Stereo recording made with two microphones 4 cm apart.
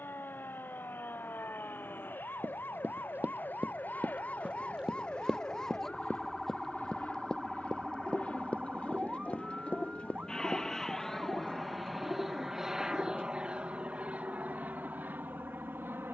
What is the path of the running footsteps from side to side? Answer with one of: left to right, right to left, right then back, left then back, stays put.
right to left.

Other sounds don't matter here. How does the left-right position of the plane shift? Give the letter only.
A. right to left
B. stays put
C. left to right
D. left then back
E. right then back
C.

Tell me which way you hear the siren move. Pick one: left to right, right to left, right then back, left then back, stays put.
left to right.